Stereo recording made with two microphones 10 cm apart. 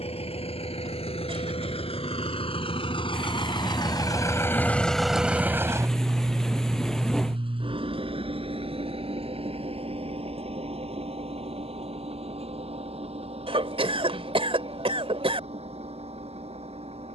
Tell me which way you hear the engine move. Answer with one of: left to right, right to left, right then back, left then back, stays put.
left to right.